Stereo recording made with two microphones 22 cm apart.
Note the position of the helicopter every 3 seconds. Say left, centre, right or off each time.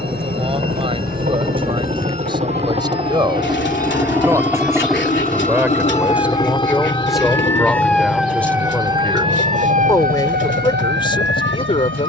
right, centre, left, left.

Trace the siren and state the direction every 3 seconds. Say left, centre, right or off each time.
left, left, centre, right.